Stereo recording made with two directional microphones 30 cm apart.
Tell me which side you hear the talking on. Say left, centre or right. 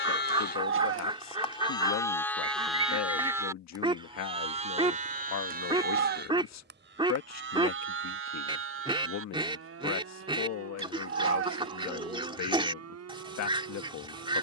left.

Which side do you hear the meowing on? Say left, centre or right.
right.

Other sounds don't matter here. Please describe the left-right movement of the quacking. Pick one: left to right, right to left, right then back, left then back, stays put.
stays put.